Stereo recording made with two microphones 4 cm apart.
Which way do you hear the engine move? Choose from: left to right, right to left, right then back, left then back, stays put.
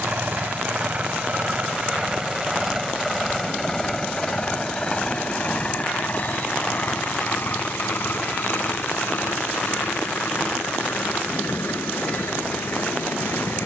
right to left.